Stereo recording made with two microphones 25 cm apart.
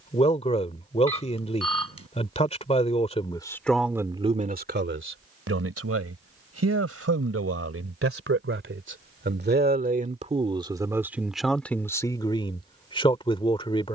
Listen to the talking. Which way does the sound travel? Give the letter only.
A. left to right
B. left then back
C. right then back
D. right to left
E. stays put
C.